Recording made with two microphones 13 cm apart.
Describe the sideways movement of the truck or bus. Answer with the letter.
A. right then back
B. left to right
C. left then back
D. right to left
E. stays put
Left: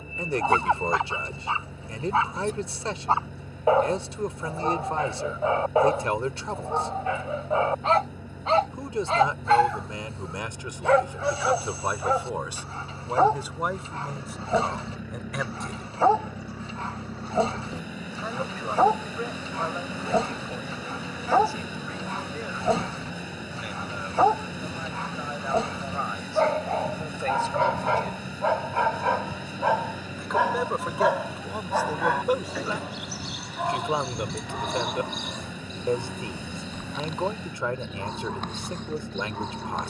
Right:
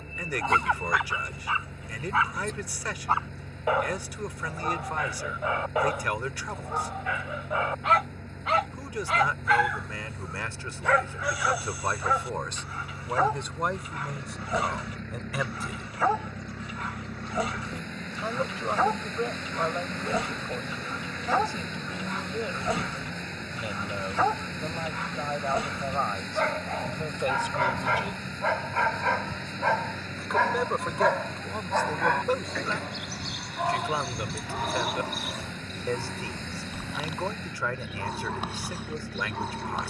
E.